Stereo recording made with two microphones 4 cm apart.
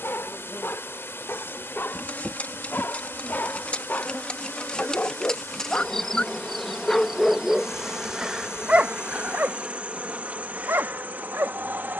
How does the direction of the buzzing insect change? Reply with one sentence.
In this clip you hear the buzzing insect move to the right.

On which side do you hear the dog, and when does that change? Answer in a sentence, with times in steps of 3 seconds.
You can hear the dog on the left from 0 s, in the centre from 6 s and on the right from 9 s.